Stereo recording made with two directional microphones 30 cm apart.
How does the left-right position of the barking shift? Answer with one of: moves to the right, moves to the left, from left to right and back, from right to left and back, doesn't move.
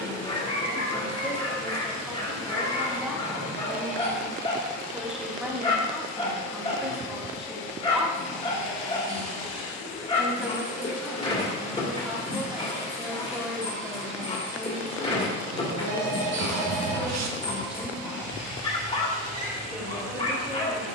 doesn't move.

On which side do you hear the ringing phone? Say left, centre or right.
right.